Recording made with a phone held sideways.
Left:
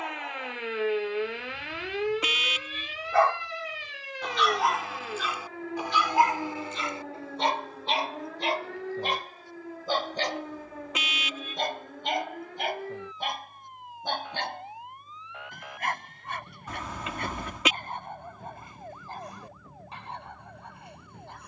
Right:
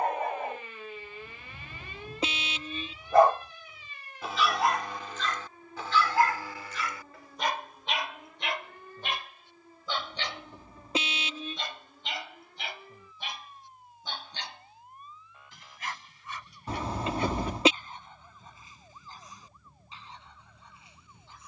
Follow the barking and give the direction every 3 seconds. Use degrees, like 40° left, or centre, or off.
40° right, centre, 30° left, 40° left, 50° left, 60° left, 60° left.